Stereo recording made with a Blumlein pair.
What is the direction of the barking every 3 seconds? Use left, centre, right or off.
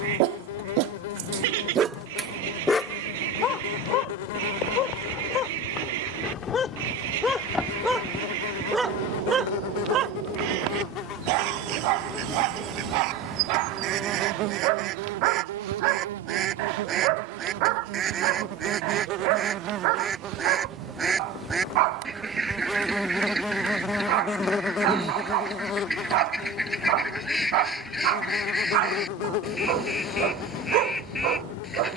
right, left, centre, right, right, right, right, right, right, right, right.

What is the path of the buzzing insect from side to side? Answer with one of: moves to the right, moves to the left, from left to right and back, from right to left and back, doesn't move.
from left to right and back.